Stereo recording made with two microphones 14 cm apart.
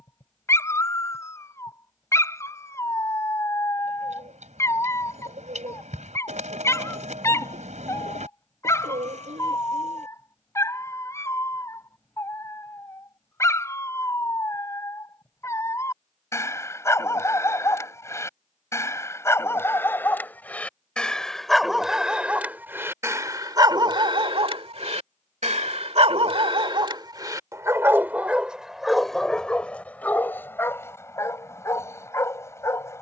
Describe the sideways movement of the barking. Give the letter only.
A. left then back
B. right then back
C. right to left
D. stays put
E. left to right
B.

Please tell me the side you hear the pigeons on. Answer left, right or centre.
right.